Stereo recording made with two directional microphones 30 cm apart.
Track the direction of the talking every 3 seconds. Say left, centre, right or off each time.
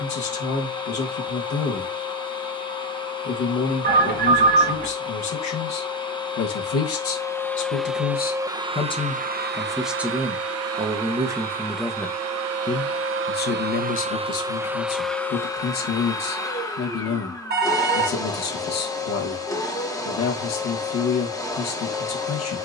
left, left, left, centre, left, left, left, left.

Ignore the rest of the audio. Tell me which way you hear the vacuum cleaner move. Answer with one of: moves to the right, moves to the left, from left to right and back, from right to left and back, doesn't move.
from left to right and back.